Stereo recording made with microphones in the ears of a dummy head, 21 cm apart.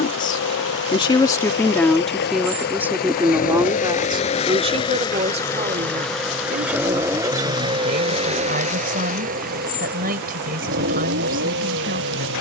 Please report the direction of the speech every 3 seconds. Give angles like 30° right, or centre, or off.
10° left, 20° right, 40° right, 40° right.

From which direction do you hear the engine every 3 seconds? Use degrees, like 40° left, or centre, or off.
50° left, 30° left, 20° right, 50° right.